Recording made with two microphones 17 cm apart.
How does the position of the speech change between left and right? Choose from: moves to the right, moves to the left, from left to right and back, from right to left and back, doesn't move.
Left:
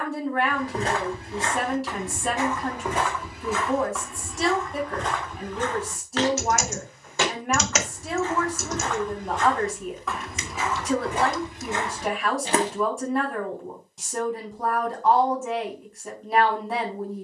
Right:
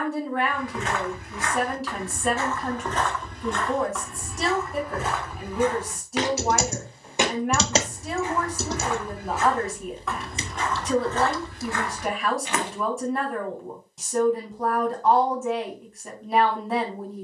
doesn't move.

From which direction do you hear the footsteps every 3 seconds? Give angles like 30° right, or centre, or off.
30° left, centre, 10° right, 10° left, 40° left, off.